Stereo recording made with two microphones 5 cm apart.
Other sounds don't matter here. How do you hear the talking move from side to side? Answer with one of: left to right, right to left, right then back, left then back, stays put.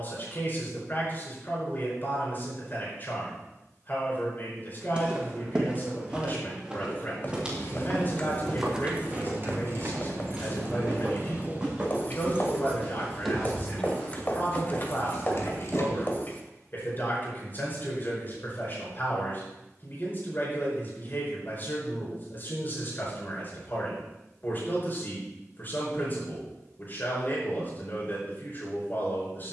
stays put.